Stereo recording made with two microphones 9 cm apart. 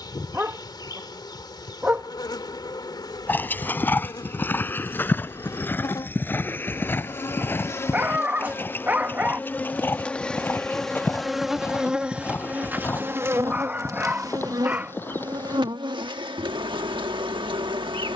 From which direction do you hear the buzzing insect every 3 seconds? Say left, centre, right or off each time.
left, left, left, centre, right, right.